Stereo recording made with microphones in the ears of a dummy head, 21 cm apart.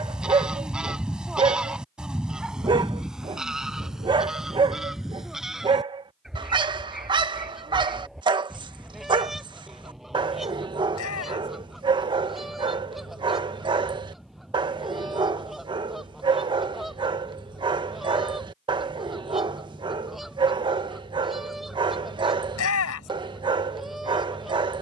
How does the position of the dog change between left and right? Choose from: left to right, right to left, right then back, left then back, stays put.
stays put.